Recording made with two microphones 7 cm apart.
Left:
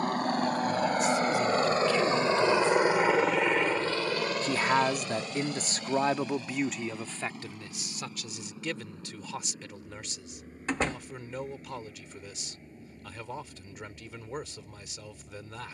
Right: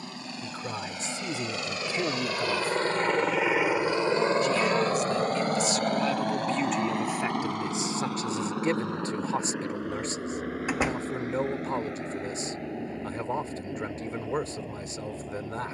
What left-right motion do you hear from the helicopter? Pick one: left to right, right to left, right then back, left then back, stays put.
left to right.